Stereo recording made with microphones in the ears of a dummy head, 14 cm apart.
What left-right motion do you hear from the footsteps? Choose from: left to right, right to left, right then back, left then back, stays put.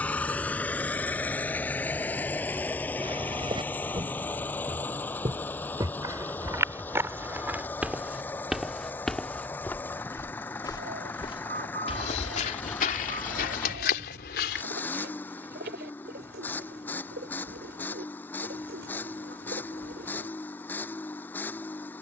right to left.